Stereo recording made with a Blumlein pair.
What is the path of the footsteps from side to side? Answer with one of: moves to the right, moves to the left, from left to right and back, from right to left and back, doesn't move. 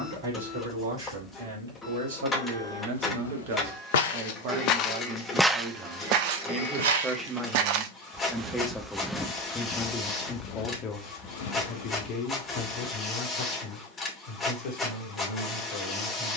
from left to right and back.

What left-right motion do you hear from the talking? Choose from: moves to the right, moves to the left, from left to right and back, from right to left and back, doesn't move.
moves to the left.